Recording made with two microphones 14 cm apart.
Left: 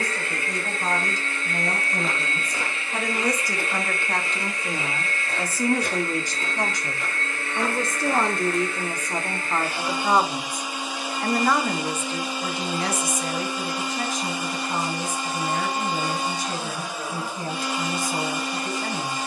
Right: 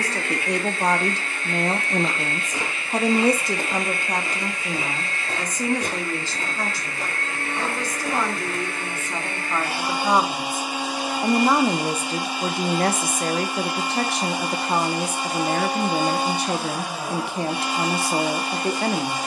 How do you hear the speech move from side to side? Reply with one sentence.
In this clip you hear the speech move from right to left and back again.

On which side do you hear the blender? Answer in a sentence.
In this clip you hear the blender on the right.